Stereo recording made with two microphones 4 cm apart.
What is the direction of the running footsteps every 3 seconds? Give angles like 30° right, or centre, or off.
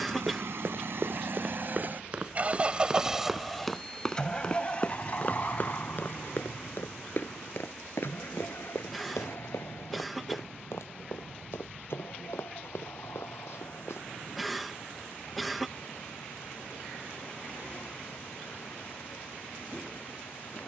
30° right, 20° left, 60° left, 80° left, 80° left, off, off.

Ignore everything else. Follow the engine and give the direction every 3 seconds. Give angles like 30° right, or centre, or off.
50° right, 20° left, 60° left, 60° left, 70° left, 70° left, 70° left.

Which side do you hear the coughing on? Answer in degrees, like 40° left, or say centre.
centre.